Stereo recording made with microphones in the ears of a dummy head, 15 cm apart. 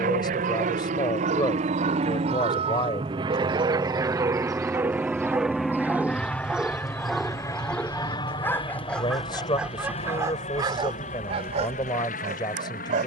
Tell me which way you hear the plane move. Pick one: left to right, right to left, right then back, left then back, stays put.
right to left.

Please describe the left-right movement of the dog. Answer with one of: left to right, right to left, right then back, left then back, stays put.
left then back.